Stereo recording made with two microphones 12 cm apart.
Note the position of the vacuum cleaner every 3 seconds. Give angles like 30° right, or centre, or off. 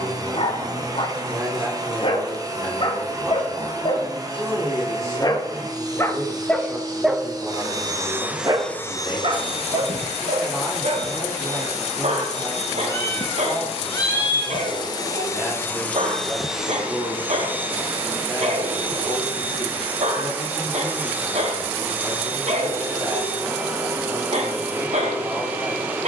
30° right, 30° right, 20° right, 60° left, 60° left, centre, 10° right, 10° right, 10° right.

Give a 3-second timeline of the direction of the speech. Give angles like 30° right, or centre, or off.
30° right, 30° right, 20° right, centre, centre, 20° right, 20° right, 20° right, 20° right.